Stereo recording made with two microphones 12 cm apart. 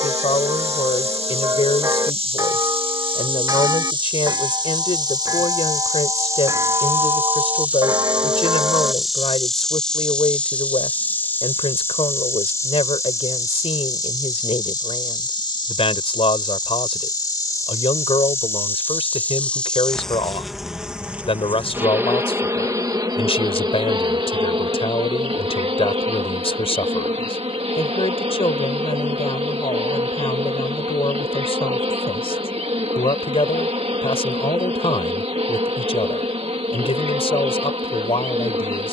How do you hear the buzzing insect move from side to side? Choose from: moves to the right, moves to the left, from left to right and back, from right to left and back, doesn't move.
from right to left and back.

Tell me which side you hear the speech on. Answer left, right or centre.
left.